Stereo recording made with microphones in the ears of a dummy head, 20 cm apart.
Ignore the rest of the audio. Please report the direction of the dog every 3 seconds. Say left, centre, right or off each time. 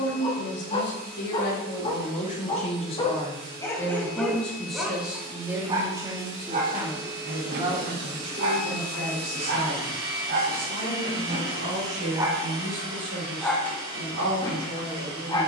left, centre, right, right, centre.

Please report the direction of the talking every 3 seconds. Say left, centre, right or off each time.
left, centre, right, right, right.